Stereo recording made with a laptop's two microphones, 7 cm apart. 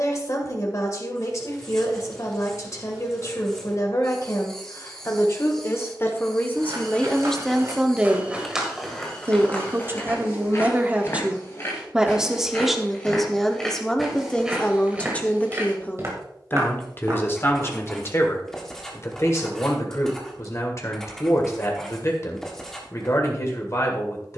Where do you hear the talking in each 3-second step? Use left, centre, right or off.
left, left, centre, right, centre, left, left, left.